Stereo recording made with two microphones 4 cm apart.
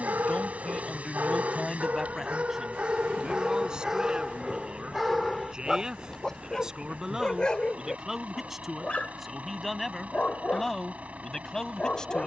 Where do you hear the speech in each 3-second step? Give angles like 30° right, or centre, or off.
10° left, 20° right, 10° right, 10° left.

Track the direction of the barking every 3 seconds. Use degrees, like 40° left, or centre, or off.
40° right, centre, 20° left, 30° left.